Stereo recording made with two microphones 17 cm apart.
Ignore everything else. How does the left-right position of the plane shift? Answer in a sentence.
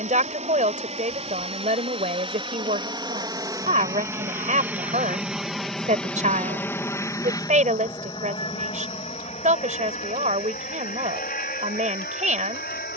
In this clip you hear the plane go from the right side to the left.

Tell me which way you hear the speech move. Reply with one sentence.
In this clip you hear the speech stay in one place.